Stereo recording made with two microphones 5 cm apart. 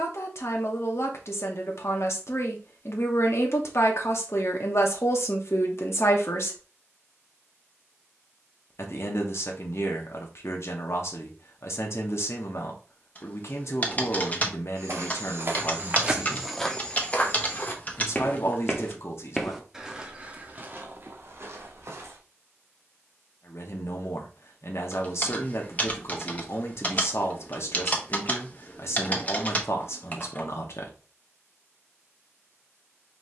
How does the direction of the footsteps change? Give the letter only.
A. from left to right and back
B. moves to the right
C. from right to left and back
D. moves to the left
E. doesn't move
C.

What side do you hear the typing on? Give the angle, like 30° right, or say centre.
30° left.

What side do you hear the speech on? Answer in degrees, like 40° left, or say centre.
60° left.